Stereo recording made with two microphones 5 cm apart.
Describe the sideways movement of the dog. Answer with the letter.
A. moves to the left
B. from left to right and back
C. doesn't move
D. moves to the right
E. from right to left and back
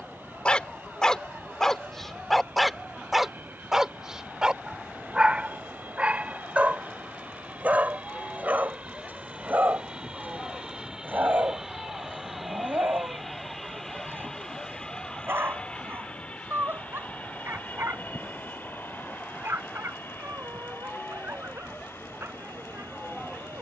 D.